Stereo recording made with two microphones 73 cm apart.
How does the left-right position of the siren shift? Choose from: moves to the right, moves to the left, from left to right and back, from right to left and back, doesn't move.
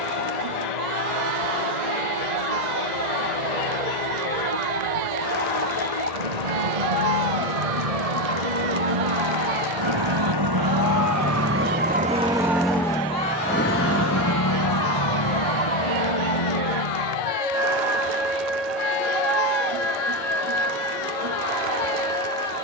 moves to the left.